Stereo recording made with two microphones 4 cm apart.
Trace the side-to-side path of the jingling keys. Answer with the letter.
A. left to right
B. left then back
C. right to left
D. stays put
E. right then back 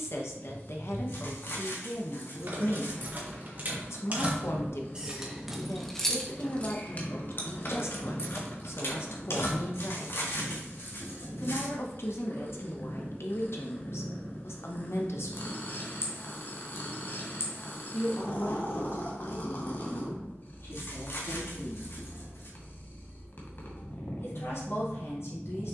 C.